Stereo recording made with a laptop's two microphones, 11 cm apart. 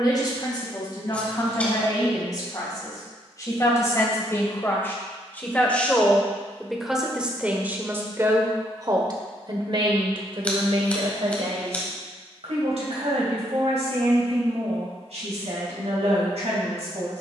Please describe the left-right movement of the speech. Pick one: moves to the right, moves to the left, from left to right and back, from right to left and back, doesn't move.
moves to the right.